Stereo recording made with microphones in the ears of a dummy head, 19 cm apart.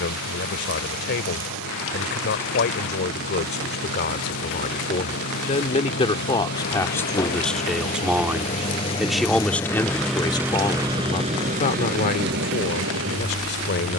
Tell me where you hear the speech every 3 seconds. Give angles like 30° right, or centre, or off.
60° left, 40° left, 10° left, 20° left, 50° left.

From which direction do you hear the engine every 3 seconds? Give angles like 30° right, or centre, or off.
60° left, 60° left, 40° left, 10° right, 60° right.